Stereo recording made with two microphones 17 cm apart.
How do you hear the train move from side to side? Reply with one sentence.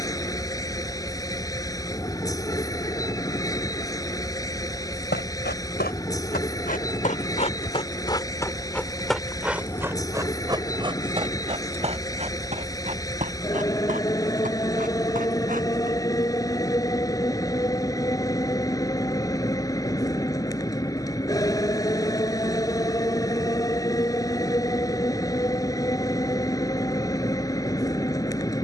In this clip you hear the train stay in one place.